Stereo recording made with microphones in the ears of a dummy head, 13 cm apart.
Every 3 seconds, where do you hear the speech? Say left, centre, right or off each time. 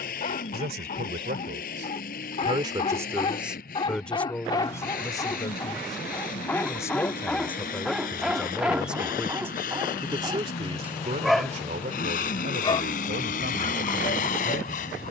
right, centre, centre, right, right.